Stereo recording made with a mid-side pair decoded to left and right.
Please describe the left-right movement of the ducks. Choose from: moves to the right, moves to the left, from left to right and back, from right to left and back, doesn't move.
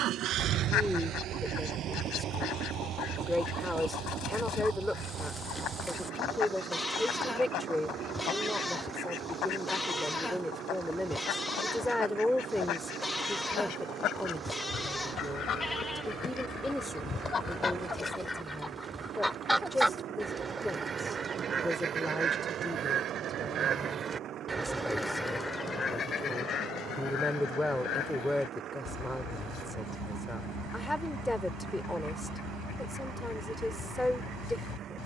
from left to right and back.